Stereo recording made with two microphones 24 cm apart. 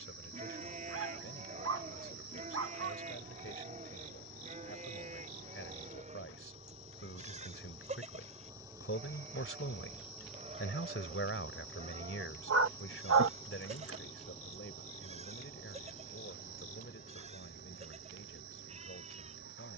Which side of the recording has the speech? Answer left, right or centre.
left.